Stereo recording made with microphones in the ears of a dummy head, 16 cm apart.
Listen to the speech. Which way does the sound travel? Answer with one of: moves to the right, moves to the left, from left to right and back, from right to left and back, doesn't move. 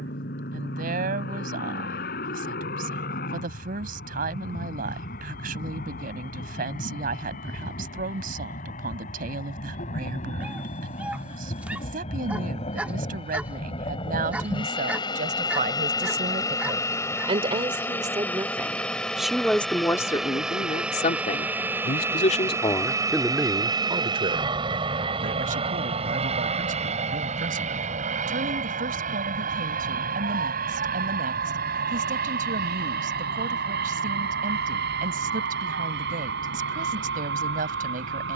from right to left and back.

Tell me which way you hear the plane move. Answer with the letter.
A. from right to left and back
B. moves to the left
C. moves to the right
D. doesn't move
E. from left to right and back
C.